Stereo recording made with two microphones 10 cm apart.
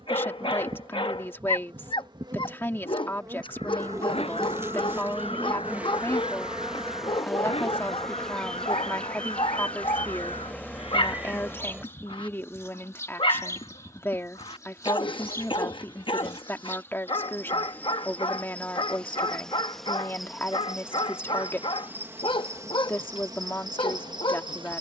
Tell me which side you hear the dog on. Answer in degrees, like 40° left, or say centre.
50° left.